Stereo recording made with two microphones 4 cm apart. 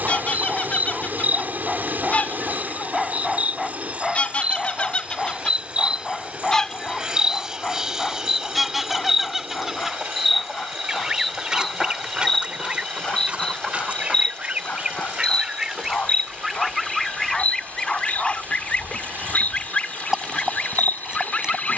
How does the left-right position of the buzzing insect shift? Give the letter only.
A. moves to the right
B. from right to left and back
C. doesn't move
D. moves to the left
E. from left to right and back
D.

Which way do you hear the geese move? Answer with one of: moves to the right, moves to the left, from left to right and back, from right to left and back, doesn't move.
from left to right and back.